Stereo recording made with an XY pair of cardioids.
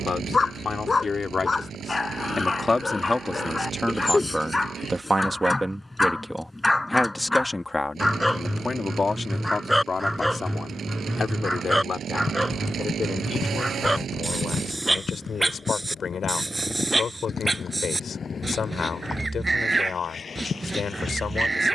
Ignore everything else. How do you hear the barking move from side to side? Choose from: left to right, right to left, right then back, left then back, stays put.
left to right.